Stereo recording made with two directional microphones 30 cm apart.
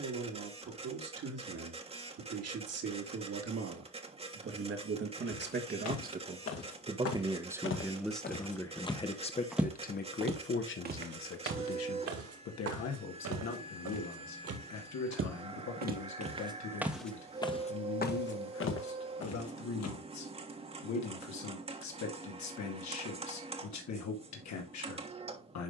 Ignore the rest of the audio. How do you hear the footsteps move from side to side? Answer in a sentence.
You can hear the footsteps move from left to right and back again.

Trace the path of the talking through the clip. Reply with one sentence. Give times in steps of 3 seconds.
You can hear the talking on the right from 0 s, in the centre from 6 s and on the left from 9 s.